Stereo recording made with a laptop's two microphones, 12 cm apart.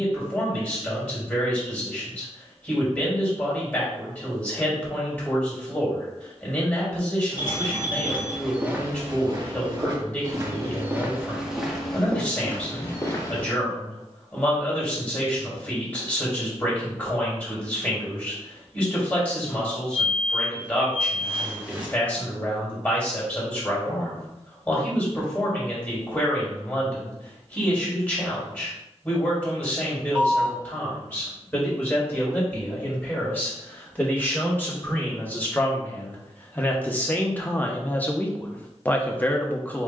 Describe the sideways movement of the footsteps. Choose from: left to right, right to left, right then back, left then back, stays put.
right then back.